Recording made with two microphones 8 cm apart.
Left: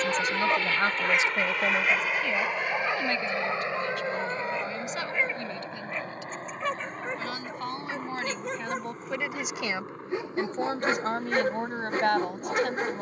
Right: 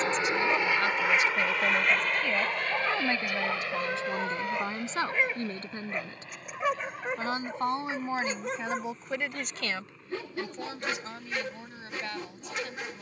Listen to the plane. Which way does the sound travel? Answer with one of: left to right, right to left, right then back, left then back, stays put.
right to left.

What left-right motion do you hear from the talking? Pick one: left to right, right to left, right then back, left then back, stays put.
right then back.